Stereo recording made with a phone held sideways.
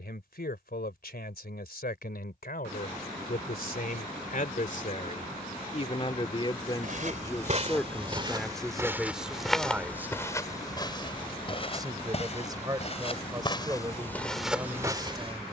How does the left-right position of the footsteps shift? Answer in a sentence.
You can hear the footsteps move from right to left and back again.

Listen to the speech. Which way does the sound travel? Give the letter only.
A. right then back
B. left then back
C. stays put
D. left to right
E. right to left
D.